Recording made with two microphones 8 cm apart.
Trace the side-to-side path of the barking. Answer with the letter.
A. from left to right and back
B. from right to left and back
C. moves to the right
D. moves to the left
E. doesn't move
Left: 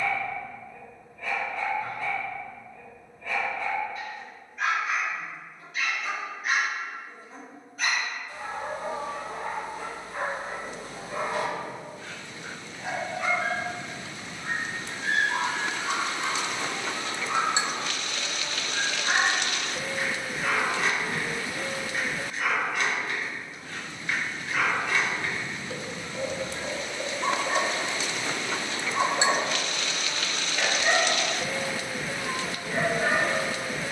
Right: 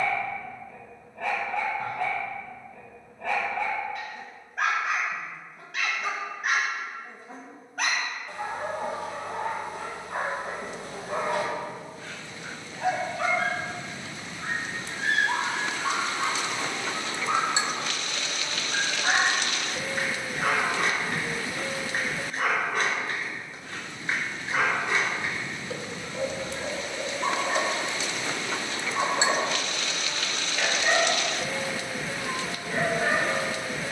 D.